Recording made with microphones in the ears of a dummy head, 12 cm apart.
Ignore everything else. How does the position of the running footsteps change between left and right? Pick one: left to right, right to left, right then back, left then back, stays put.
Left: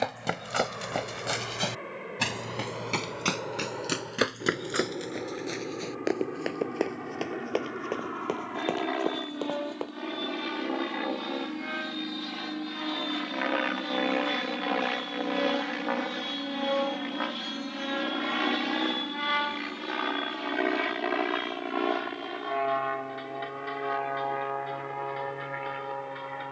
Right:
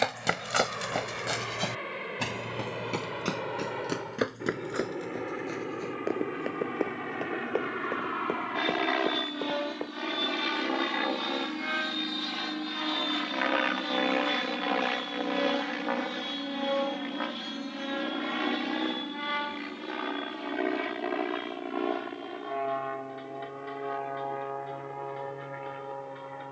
right to left.